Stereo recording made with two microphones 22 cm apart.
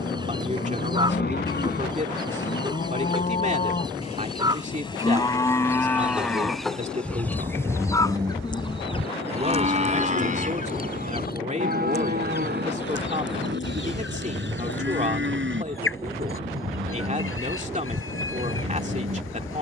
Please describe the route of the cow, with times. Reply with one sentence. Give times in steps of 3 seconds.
In this clip you hear the cow on the left from 0 s, in the centre from 6 s and on the right from 9 s.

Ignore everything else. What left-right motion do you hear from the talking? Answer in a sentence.
You can hear the talking stay in one place.